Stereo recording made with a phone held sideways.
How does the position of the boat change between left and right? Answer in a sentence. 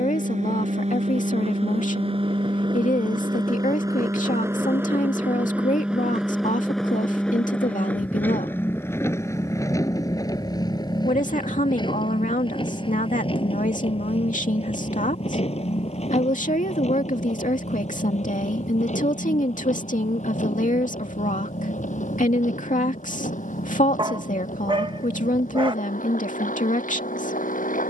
In this clip you hear the boat go from the right side to the left.